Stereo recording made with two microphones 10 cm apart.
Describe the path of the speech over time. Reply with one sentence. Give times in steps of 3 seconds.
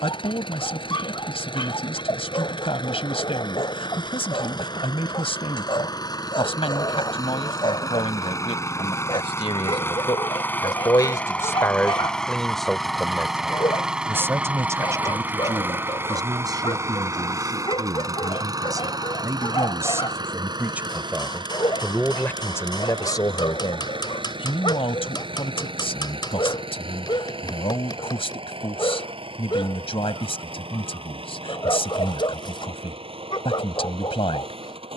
You can hear the speech on the left from 0 s, in the centre from 12 s, on the right from 15 s and on the left from 21 s.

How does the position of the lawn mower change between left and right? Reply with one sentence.
In this clip you hear the lawn mower move to the right.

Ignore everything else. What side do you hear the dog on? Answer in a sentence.
You can hear the dog on the left.